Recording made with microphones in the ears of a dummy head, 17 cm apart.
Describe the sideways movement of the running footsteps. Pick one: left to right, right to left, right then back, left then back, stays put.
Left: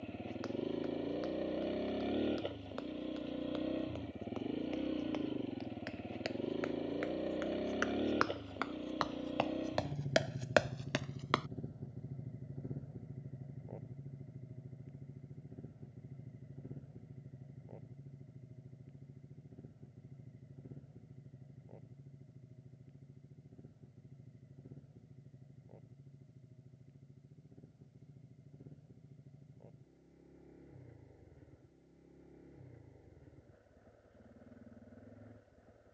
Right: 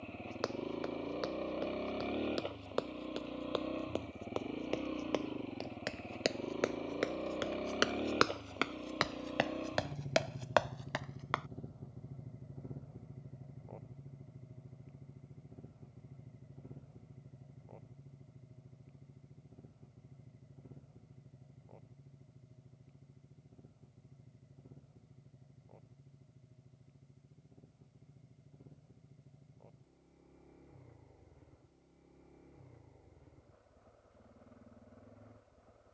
right to left.